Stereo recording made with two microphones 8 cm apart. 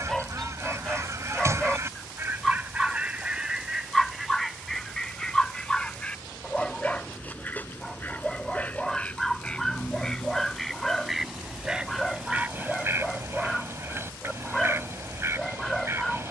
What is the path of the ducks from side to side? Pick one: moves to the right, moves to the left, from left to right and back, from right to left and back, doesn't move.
from right to left and back.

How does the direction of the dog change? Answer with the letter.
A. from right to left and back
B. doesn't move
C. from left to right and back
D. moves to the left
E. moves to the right
B.